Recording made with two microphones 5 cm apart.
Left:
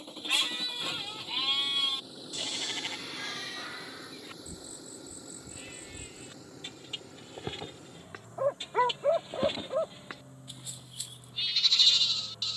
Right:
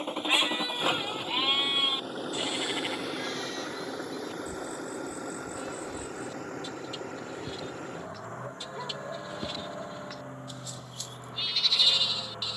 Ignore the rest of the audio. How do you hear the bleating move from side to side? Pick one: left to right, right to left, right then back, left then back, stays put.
left then back.